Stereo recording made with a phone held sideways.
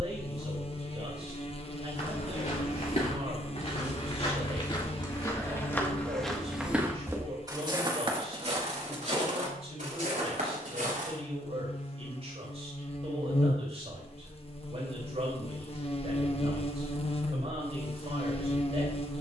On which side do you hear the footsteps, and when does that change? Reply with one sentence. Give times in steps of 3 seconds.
You can hear the footsteps on the left from 0 s, on the right from 6 s and not at all from 12 s.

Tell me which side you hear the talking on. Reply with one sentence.
You can hear the talking on the right.